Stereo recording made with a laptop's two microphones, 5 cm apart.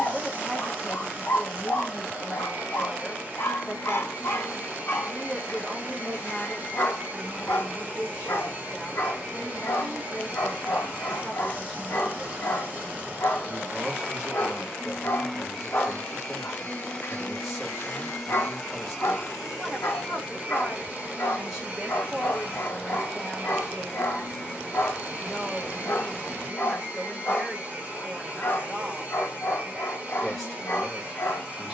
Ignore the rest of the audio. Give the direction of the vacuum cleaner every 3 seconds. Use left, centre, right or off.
right, right, right, right, right, centre, centre, right, right, right, right.